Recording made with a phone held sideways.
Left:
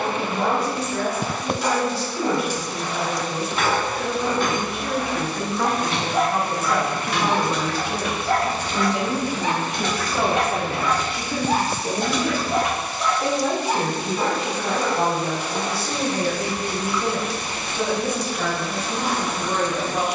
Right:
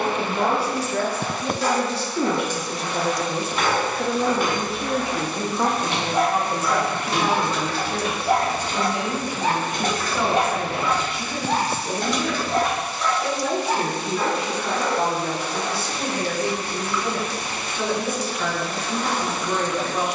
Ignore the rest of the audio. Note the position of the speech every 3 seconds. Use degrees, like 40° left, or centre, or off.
70° right, 30° right, 10° left, 40° left, 50° left, 50° left, 60° left.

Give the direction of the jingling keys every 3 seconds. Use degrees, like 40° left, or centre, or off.
20° left, 10° right, 40° right, 30° right, 10° left, off, off.